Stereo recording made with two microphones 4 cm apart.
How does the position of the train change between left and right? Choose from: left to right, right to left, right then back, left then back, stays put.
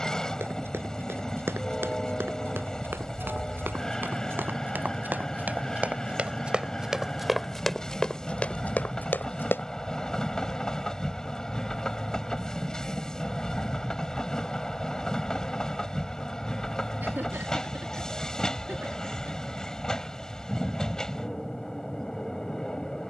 stays put.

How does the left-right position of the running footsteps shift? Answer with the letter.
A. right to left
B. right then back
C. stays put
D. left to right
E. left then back
A.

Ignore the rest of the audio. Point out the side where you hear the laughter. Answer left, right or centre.
right.